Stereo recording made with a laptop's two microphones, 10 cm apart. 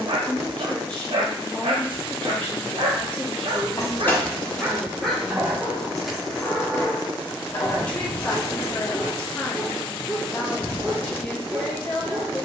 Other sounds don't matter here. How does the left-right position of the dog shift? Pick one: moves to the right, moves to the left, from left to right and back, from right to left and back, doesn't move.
from right to left and back.